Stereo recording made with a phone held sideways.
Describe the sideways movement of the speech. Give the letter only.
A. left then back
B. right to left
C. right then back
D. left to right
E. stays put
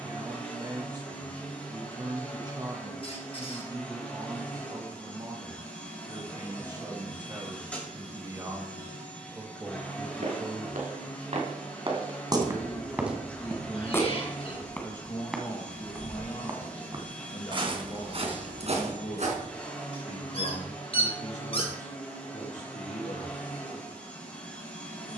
B.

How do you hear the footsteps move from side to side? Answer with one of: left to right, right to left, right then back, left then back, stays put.
left then back.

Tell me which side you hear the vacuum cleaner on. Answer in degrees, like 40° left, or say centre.
10° left.